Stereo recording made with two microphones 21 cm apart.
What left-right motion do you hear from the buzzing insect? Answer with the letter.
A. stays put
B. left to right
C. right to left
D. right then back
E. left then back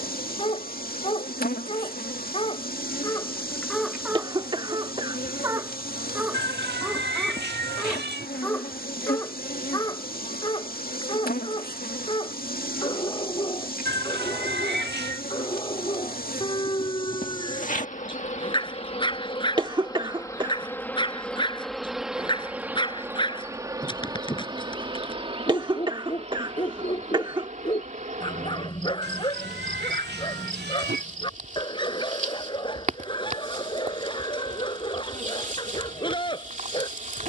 B.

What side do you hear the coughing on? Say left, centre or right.
right.